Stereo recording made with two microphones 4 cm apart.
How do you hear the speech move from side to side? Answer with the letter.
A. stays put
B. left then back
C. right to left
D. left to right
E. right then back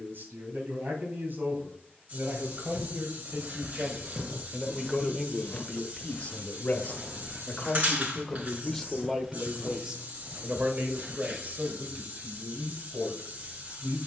B.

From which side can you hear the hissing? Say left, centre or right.
right.